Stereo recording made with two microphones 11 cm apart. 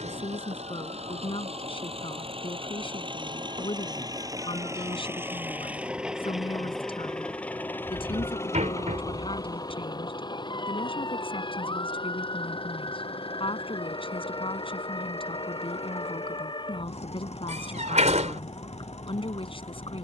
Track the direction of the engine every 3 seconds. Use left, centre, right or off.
right, right, centre, left, left, left, left.